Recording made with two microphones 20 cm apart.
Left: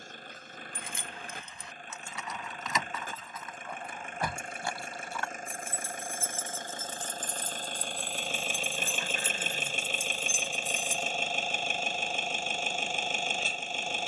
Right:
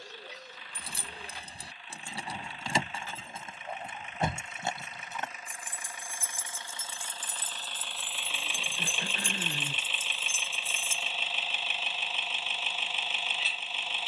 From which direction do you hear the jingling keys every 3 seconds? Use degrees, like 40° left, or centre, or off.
30° right, 20° right, 10° right, 10° left, off.